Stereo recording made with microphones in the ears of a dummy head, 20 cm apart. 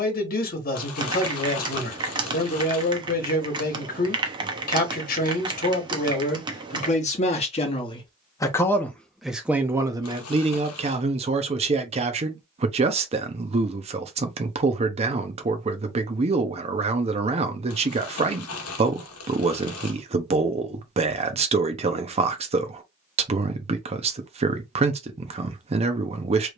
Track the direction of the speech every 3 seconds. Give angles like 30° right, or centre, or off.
40° left, 40° left, 30° left, 20° right, 30° right, 30° right, 30° right, 30° right, 30° right.